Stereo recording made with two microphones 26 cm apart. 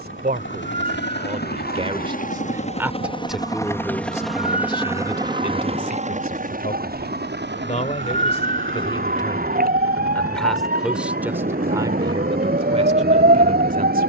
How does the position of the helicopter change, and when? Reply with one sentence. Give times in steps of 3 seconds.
In this clip you hear the helicopter on the left from 0 s, in the centre from 3 s and on the right from 6 s.